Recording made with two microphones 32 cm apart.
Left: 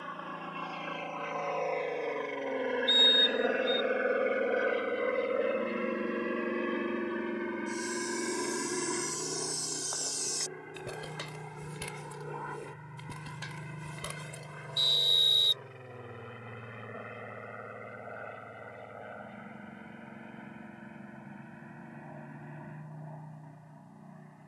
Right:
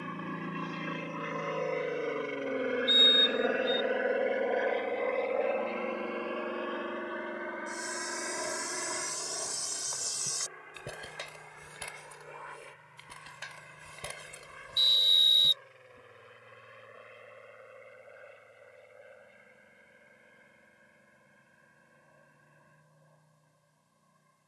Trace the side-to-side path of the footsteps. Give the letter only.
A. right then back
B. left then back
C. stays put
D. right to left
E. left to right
B.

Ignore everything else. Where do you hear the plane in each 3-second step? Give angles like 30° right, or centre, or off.
20° right, 10° left, 30° left, 50° left, 60° left, 60° left, 70° left, 70° left.